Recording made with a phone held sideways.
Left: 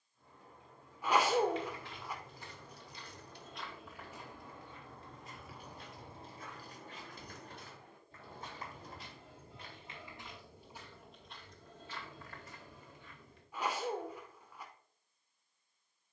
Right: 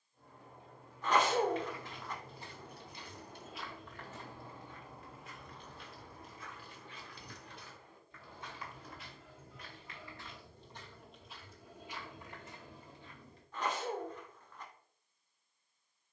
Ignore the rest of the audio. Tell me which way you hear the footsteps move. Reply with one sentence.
In this clip you hear the footsteps go left and come back.